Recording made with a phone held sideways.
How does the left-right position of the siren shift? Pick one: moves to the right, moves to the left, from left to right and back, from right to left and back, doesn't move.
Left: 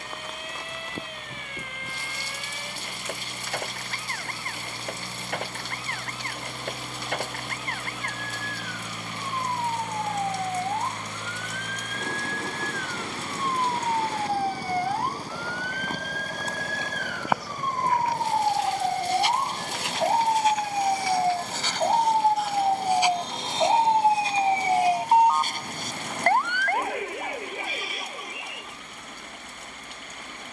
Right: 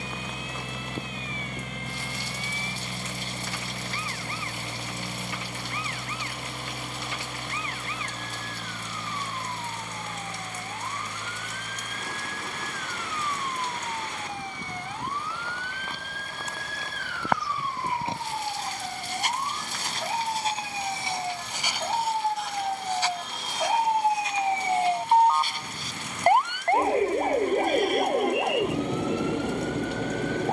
moves to the right.